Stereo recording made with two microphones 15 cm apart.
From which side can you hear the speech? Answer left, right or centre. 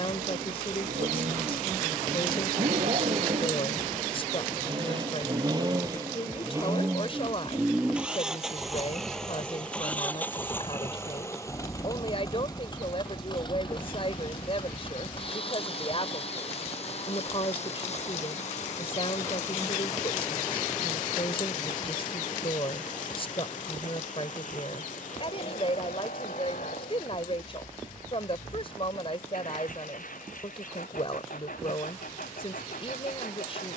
left.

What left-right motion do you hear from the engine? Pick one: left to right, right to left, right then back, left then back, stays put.
right to left.